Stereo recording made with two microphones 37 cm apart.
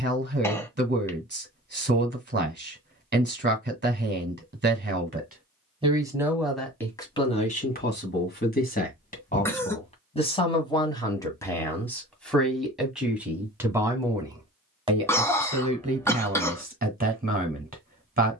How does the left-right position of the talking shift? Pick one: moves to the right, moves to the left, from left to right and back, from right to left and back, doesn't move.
from right to left and back.